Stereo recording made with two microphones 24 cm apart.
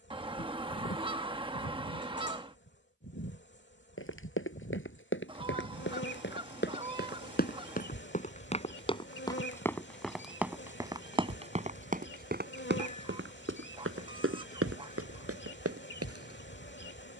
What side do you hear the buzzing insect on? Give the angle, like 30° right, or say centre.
50° left.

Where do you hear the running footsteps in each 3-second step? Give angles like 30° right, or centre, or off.
off, 50° left, 40° left, 10° right, 50° right, 70° right.